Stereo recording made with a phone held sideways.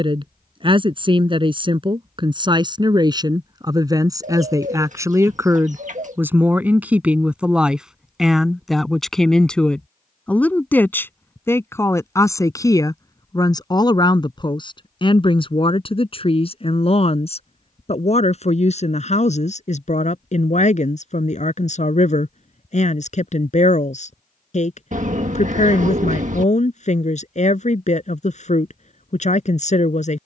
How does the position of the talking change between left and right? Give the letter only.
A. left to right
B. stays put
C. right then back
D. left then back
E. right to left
E.